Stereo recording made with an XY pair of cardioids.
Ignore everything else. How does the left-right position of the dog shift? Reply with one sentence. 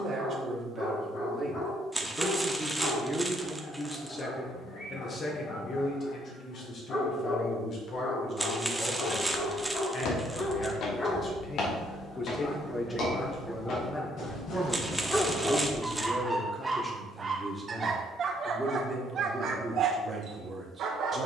You can hear the dog travel towards the right.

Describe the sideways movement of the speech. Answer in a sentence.
You can hear the speech go left and come back.